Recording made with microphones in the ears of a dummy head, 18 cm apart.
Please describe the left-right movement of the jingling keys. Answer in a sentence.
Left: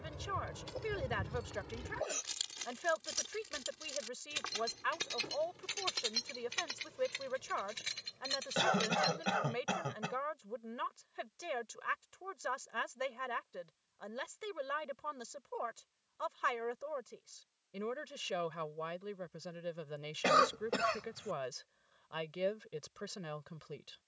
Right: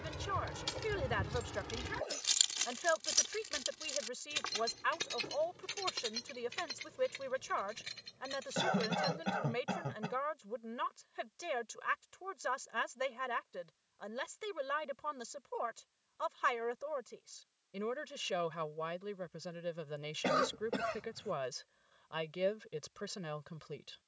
You can hear the jingling keys go from the right side to the left.